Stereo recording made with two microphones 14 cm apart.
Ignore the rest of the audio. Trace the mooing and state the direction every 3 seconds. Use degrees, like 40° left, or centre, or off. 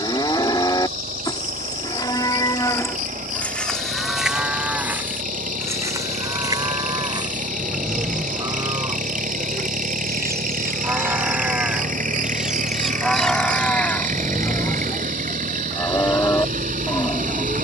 30° left, 10° right, 30° right, 20° right, 10° left, 20° left.